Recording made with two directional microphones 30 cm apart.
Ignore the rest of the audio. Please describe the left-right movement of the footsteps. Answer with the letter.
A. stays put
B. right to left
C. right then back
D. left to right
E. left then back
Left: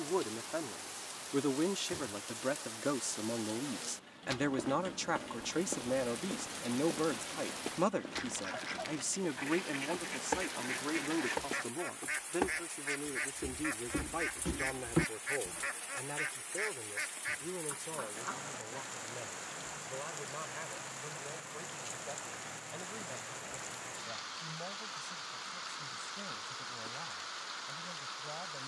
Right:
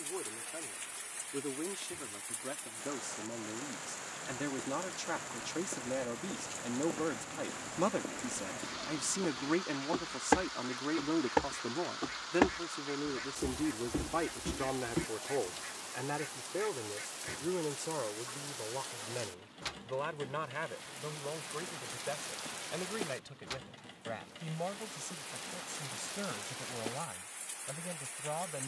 C.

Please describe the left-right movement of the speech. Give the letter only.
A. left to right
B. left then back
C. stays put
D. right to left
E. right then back
A.